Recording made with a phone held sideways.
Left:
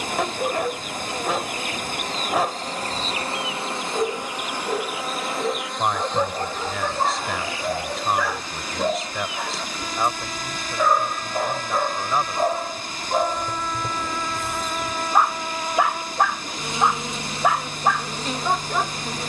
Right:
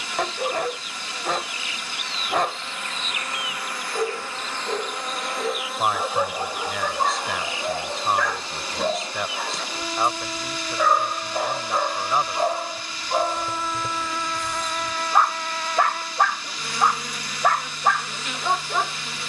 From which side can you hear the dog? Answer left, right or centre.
centre.